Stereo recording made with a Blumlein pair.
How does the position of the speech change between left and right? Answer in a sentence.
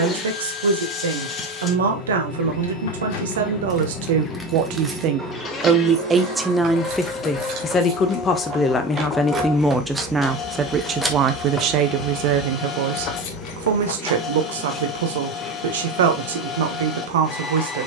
In this clip you hear the speech move from right to left and back again.